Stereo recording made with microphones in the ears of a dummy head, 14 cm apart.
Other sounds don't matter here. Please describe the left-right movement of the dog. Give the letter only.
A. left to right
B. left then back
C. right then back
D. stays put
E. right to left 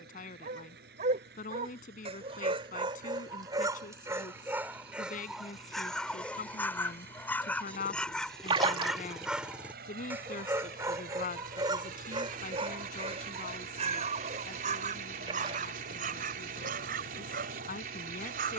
B.